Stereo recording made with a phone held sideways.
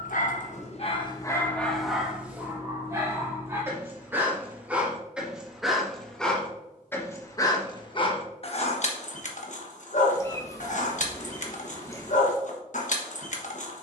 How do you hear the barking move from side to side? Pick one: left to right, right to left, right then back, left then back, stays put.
right then back.